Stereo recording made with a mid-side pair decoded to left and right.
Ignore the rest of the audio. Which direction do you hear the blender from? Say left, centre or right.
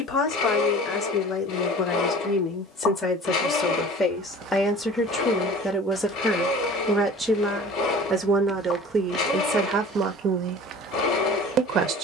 left.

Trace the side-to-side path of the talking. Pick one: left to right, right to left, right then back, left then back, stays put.
left to right.